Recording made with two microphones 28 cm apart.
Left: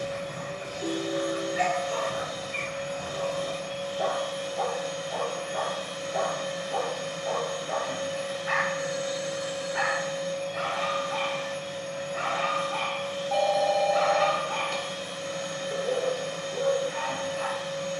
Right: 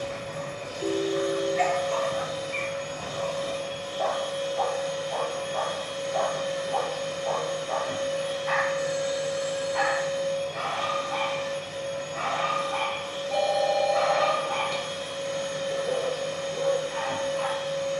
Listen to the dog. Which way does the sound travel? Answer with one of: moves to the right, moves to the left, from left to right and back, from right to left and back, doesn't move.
doesn't move.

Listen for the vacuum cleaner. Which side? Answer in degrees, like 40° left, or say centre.
70° right.